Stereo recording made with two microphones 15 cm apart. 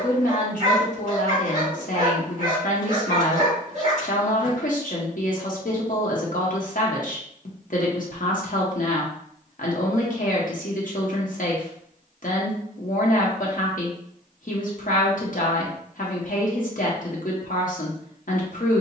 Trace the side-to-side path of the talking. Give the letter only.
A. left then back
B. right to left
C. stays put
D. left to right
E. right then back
C.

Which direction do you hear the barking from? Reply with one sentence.
You can hear the barking on the right.